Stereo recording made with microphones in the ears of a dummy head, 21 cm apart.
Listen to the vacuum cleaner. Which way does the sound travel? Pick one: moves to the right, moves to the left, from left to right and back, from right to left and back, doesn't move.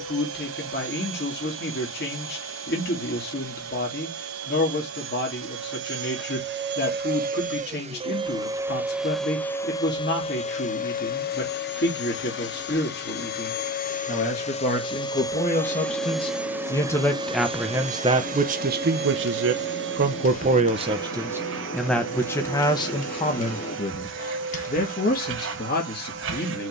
from right to left and back.